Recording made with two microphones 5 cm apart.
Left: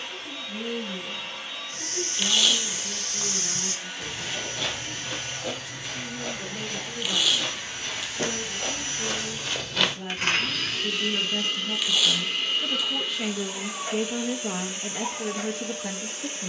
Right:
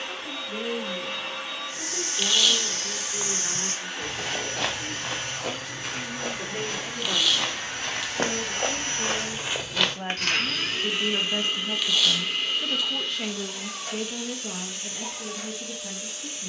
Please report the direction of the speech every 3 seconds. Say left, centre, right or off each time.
right, right, right, right, centre, left.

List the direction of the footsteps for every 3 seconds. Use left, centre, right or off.
left, right, right, centre, off, off.